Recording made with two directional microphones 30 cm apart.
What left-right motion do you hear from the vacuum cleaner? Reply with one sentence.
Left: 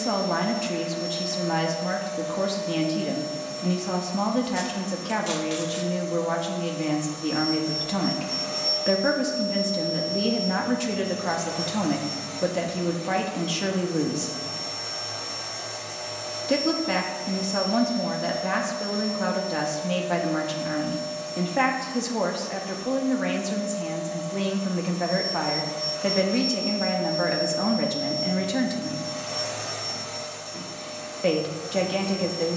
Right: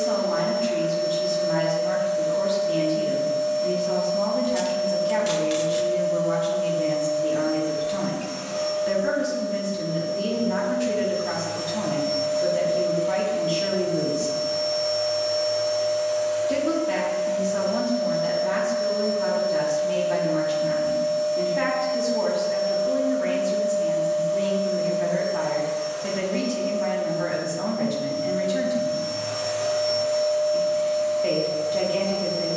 You can hear the vacuum cleaner stay put.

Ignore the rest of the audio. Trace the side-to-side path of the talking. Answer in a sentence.
You can hear the talking stay put.